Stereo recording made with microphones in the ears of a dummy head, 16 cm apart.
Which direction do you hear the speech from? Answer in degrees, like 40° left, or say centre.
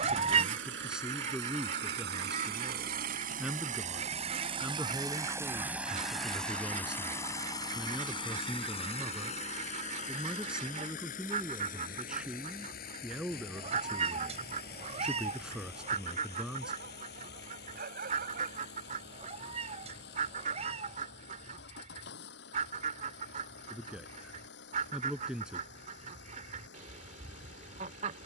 10° right.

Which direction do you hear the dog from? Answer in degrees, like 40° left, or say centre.
50° right.